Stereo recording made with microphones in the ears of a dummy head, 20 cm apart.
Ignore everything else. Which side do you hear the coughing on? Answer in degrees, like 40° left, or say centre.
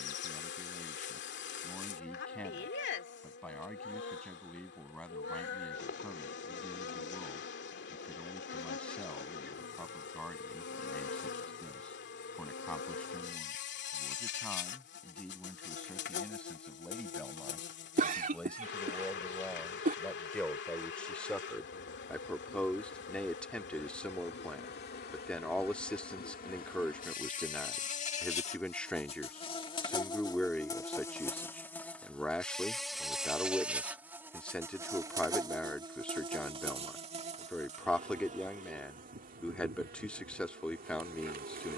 40° right.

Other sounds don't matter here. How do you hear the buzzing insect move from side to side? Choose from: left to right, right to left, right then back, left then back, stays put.
left to right.